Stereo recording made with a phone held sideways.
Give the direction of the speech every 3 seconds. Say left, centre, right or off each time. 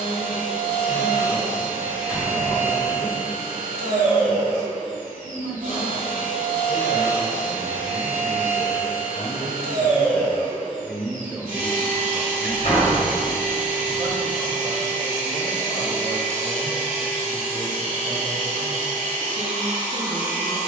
left, left, left, centre, right, right, right.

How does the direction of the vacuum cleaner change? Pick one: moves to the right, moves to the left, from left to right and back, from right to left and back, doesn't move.
doesn't move.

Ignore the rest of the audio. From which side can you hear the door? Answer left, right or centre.
left.